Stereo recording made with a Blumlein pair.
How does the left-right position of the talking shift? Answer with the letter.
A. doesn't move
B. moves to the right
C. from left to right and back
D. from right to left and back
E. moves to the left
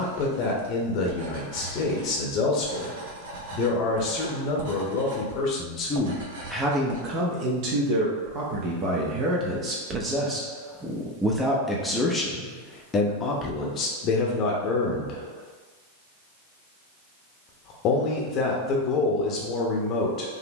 C.